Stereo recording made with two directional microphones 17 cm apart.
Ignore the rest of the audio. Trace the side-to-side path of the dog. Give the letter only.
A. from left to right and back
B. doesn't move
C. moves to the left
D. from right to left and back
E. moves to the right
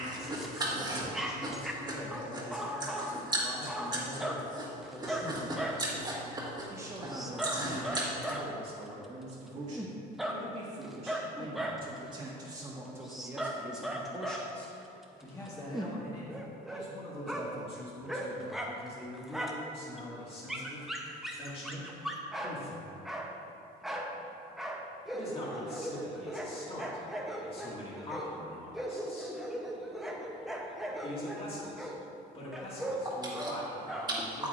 B.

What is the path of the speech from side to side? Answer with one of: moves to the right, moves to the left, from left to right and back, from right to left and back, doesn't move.
from left to right and back.